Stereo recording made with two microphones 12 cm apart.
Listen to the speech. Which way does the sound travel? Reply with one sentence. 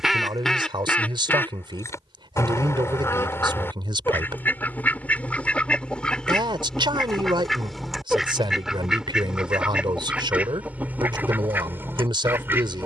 You can hear the speech stay put.